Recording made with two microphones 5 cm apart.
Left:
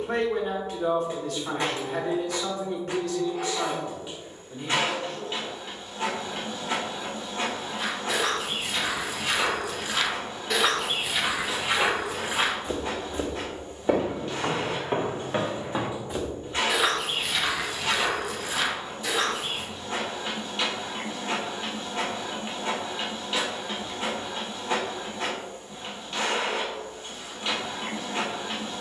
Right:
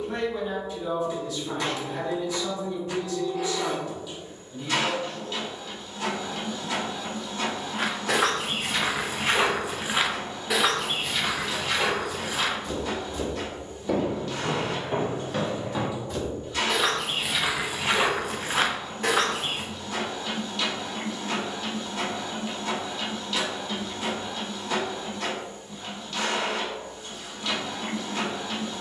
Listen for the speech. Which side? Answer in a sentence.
In this clip you hear the speech on the left.